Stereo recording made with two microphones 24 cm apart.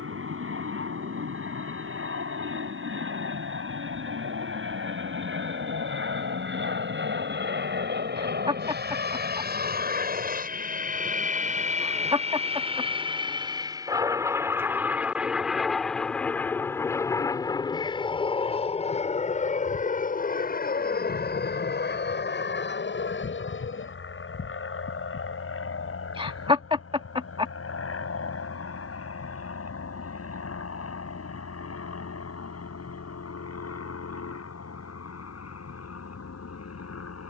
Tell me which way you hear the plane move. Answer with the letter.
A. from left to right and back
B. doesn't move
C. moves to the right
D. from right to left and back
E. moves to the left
E.